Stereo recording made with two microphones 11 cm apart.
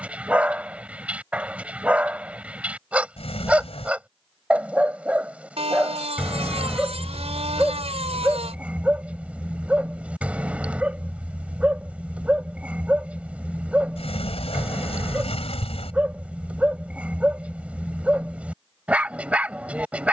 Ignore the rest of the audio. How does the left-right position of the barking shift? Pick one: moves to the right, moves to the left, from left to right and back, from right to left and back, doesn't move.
doesn't move.